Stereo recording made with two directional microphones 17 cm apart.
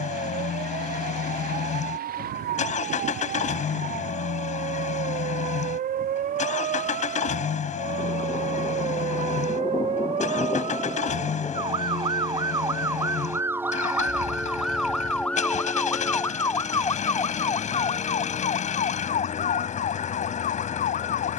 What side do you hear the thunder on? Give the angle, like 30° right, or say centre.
20° left.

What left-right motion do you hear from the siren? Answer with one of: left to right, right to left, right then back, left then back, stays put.
right to left.